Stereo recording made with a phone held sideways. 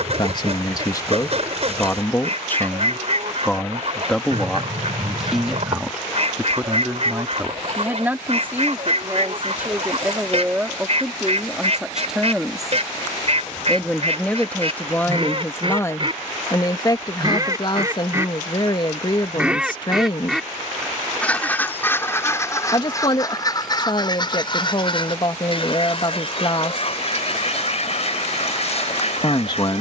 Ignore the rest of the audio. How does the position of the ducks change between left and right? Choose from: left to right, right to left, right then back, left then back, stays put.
right to left.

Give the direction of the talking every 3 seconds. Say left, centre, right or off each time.
left, centre, centre, centre, centre, left, left, left, left, left.